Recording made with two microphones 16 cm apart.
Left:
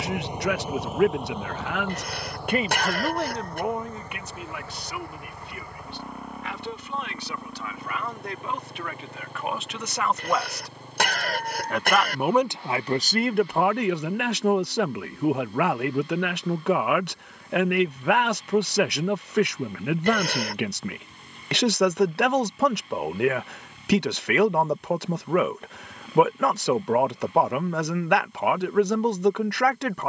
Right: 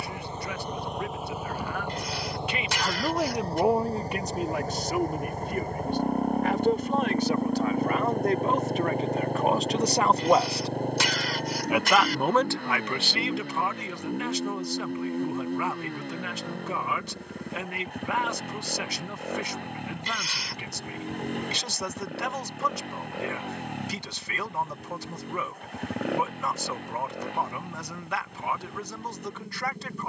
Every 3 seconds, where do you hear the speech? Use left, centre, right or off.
left, right, right, right, left, left, left, left, left, left.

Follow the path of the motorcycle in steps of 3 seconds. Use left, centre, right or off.
centre, right, right, right, right, right, right, right, right, right.